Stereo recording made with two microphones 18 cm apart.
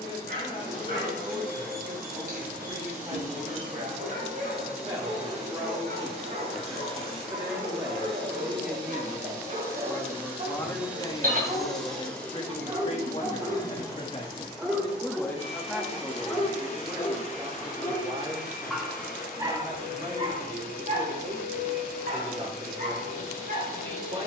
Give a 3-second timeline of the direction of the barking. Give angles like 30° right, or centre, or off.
70° right, 70° right, 60° right, 50° right, 20° right, 10° left, 30° right, 60° right.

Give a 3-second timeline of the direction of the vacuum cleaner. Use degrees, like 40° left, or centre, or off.
50° right, 50° right, 30° right, 10° right, 20° left, 50° left, 60° left, 60° left.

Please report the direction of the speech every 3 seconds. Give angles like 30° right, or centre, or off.
30° right, 30° right, 10° right, 20° left, 40° left, 10° right, 30° right, 30° right.